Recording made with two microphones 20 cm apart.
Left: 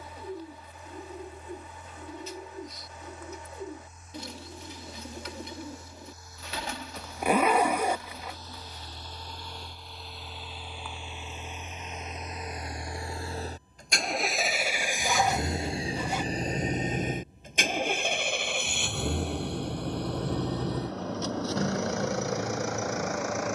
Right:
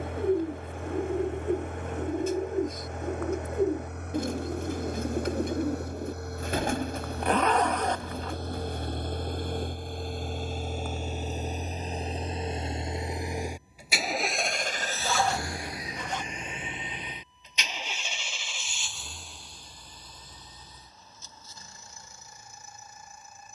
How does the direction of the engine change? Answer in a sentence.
In this clip you hear the engine go from the right side to the left.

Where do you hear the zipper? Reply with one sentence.
You can hear the zipper in the centre.